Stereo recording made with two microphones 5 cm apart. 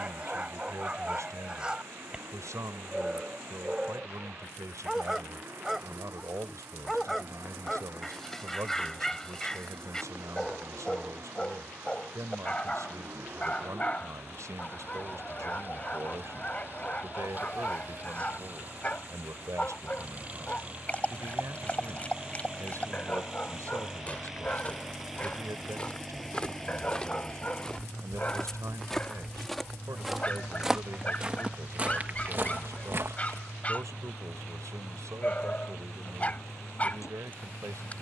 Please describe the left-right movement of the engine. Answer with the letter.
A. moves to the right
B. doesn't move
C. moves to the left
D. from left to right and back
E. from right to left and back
C.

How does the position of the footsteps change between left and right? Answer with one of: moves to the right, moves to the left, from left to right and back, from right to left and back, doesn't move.
moves to the right.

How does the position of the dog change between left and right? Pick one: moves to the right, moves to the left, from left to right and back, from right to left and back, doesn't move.
moves to the left.